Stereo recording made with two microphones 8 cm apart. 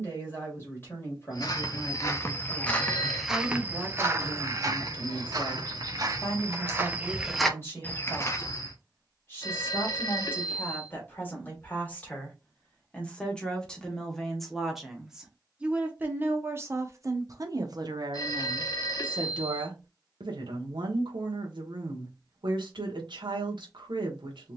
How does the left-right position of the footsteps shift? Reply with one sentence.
You can hear the footsteps move from left to right and back again.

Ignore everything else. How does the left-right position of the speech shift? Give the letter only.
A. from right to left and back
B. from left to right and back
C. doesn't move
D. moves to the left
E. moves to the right
E.